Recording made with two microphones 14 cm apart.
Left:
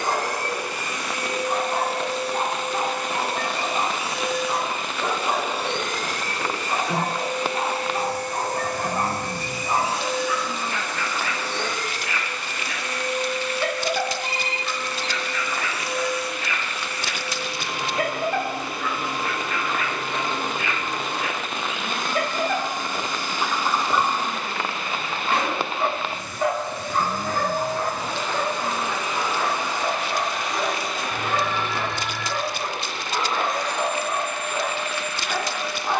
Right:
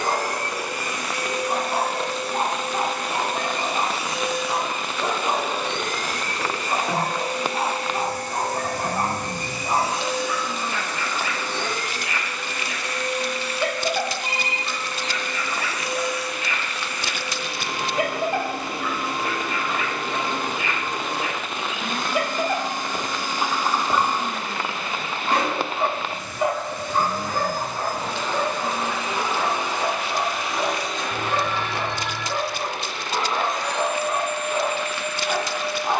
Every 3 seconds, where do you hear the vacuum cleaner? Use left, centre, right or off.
right, right, right, right, right, right, right, right, right, right, centre, left.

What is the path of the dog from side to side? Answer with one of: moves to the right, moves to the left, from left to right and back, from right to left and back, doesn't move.
doesn't move.